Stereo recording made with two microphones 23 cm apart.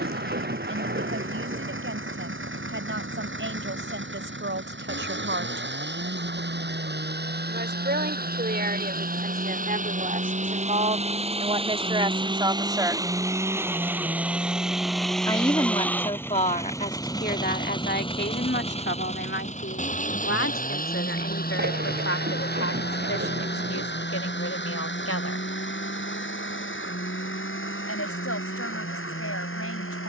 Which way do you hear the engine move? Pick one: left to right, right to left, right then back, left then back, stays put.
right to left.